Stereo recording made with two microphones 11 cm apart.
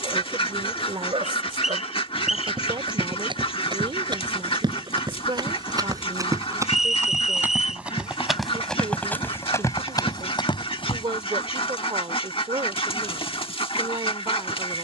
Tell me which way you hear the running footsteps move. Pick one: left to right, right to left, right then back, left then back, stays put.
right to left.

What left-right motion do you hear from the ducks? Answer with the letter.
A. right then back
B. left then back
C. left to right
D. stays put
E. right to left
D.